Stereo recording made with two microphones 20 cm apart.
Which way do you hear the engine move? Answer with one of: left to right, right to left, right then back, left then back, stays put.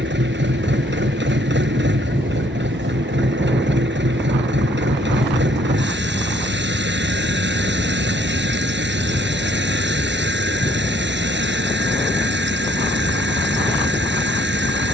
stays put.